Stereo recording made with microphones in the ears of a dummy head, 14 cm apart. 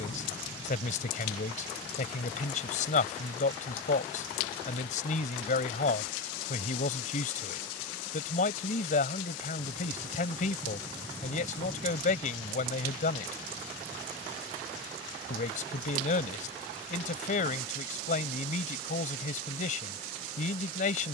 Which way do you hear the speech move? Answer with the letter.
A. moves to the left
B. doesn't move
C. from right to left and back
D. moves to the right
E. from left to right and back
B.